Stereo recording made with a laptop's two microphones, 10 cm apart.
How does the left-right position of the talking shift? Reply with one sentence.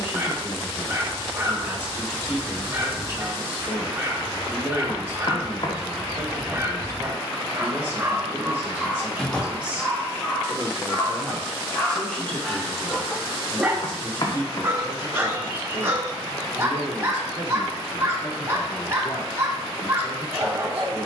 You can hear the talking travel towards the left.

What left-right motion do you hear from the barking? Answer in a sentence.
In this clip you hear the barking go left and come back.